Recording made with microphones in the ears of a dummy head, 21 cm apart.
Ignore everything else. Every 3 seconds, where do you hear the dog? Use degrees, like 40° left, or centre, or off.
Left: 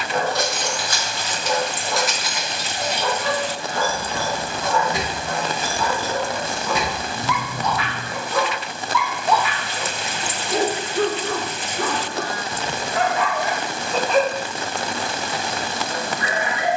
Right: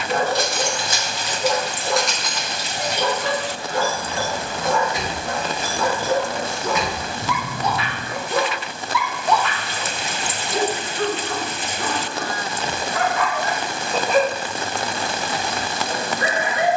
40° right, 40° right, 30° right, 30° left, 10° left, 40° right.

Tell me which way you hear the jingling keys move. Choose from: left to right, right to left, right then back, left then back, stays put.
left then back.